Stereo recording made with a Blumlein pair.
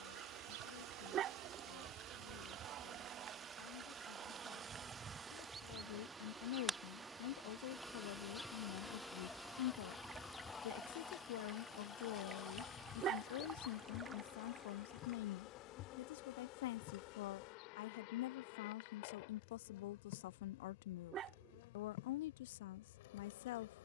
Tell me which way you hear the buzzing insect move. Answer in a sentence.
In this clip you hear the buzzing insect move from right to left.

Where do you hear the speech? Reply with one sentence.
You can hear the speech on the left.